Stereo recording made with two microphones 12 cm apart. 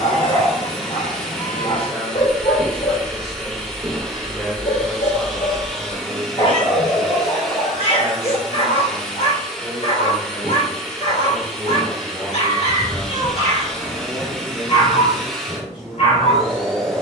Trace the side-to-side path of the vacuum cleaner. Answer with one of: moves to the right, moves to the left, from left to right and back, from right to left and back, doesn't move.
doesn't move.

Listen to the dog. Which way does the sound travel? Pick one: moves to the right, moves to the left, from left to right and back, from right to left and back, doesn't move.
doesn't move.